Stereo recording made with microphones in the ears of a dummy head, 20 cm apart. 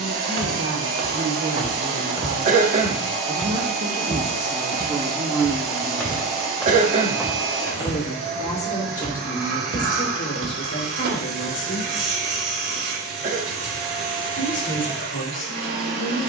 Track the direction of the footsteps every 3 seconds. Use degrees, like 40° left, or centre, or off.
40° right, 20° left, 10° right, 50° right, off, off.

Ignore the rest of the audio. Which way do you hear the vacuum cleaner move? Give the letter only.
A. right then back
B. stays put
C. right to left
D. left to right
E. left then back
B.